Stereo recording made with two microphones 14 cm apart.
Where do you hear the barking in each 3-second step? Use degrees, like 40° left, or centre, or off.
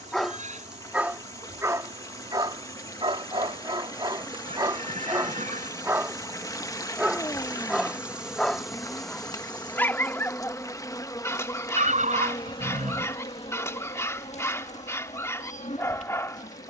20° right, 30° right, centre, 20° left, 20° left, 20° left.